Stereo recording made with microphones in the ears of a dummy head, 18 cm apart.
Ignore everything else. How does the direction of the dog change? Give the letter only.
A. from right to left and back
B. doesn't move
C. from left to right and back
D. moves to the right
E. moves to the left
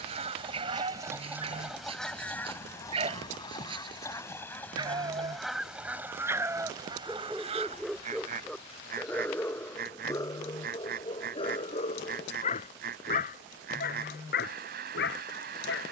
E.